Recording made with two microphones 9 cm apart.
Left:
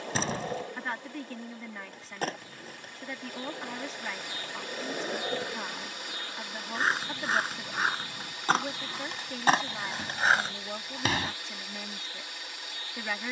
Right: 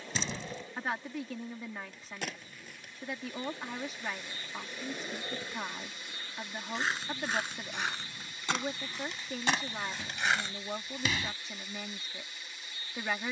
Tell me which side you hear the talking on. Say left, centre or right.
centre.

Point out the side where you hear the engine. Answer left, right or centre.
left.